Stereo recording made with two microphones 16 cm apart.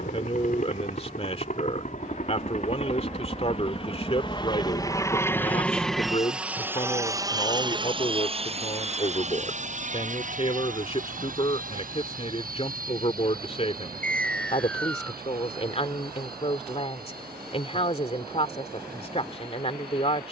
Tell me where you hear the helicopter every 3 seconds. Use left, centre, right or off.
left, left, right, right, right, right, right.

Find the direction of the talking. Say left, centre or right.
left.